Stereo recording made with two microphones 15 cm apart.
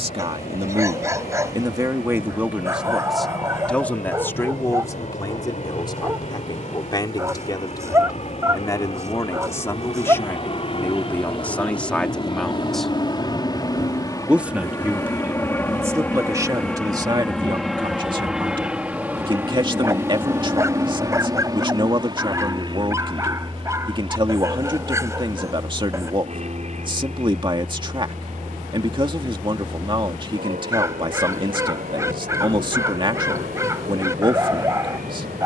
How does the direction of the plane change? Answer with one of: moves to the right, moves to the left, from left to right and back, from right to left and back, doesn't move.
moves to the right.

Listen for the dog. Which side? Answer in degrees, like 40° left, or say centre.
20° right.